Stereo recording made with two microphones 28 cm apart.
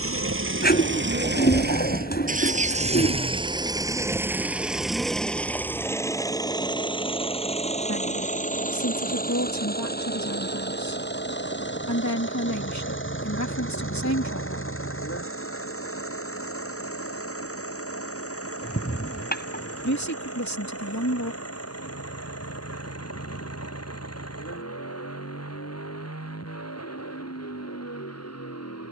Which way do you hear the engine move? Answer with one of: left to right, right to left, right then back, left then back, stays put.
right to left.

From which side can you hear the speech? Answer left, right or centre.
left.